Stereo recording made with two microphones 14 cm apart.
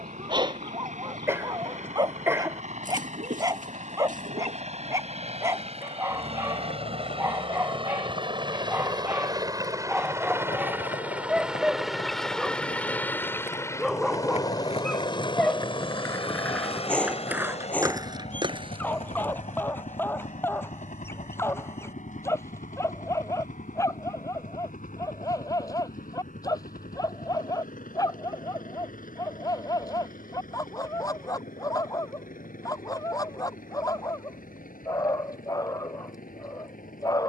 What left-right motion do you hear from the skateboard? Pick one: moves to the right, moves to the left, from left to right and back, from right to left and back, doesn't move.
moves to the right.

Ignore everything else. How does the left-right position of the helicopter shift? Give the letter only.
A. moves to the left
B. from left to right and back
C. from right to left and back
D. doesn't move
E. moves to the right
A.